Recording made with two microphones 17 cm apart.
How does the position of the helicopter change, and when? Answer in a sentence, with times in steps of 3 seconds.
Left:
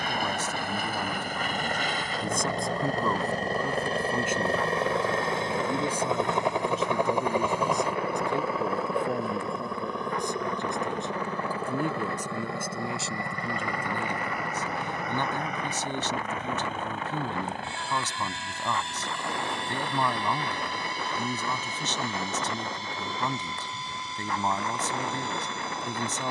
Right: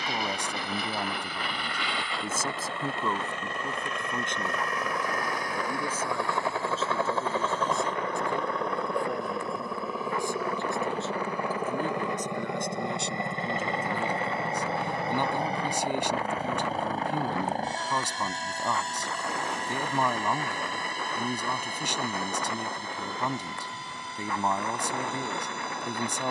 In this clip you hear the helicopter on the left from 0 s, in the centre from 6 s and on the right from 12 s.